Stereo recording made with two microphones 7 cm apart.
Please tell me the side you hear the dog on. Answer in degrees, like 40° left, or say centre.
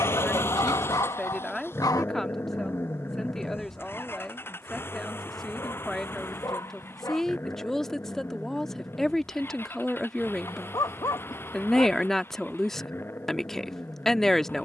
50° left.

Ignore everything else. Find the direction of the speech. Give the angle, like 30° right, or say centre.
centre.